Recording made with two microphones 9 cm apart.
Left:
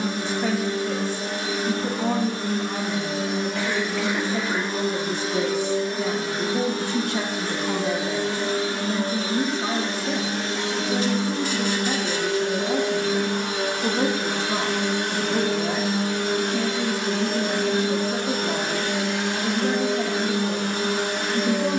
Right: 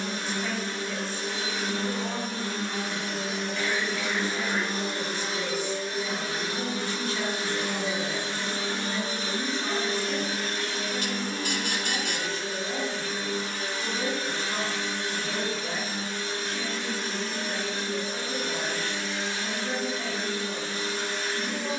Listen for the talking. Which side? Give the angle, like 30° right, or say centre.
60° left.